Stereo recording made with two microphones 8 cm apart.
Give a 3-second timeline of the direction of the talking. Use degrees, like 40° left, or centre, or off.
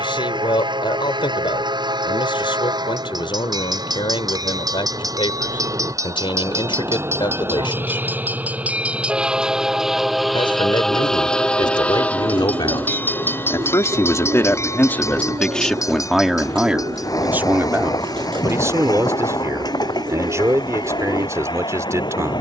70° left, 70° left, 70° left, 70° left, 40° left, 10° right, 40° right, 40° right.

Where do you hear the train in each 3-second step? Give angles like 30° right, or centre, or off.
60° right, 50° right, 30° right, centre, 20° left, 40° left, 50° left, 50° left.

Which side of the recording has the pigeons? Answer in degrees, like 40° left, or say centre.
80° right.